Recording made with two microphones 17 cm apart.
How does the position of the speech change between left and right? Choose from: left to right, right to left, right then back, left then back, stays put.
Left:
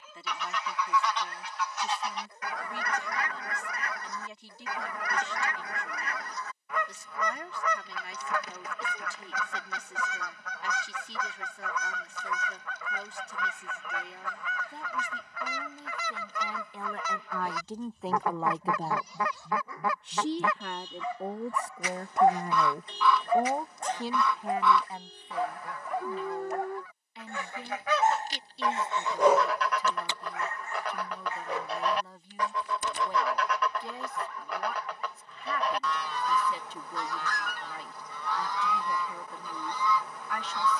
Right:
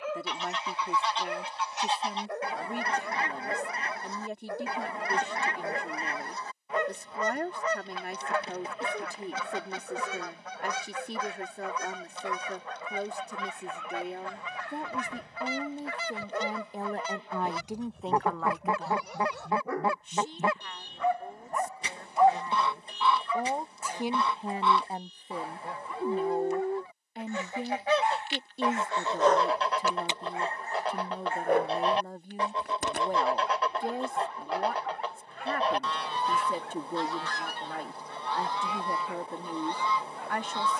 left then back.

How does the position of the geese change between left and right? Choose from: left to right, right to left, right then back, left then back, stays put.
stays put.